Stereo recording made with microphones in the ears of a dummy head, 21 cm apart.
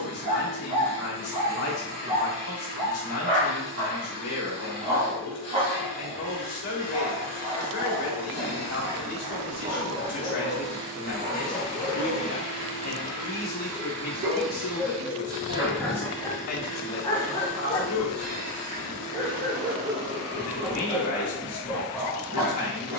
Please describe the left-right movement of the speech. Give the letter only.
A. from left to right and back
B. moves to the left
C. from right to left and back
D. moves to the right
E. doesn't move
E.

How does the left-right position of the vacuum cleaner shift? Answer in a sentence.
You can hear the vacuum cleaner travel towards the right.